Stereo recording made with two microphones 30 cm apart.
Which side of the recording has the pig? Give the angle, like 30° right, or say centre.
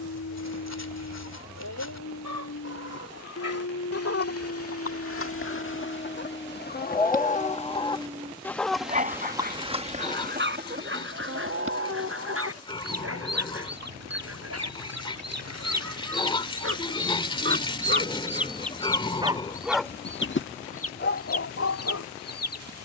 20° left.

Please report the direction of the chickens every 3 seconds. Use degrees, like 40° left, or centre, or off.
60° left, 50° left, 20° left, 30° right, 60° right, 50° right, 20° left, 60° left.